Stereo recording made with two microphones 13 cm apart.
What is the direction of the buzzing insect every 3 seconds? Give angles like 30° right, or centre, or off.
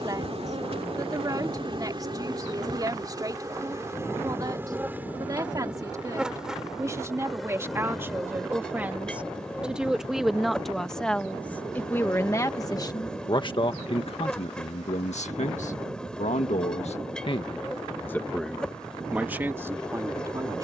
40° right, 20° right, centre, 10° left, 10° left, 10° left, 10° left.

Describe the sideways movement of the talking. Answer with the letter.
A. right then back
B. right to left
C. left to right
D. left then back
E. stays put
D.